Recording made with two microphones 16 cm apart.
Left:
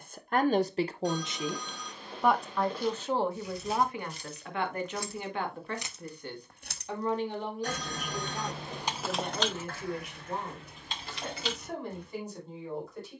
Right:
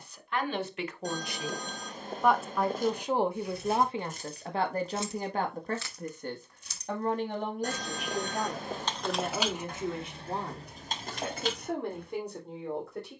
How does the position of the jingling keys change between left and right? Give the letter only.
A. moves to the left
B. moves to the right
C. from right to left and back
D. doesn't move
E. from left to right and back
C.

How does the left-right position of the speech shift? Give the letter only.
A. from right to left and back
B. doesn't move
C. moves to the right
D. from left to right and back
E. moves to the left
C.